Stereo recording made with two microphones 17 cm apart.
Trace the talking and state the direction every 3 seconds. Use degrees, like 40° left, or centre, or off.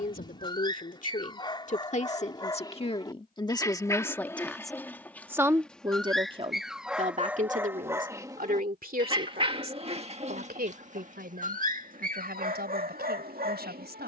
50° left, 10° left, 50° right, 70° right, 80° right.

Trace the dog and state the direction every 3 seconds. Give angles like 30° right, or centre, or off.
30° left, 10° left, 10° right, 40° right, 60° right.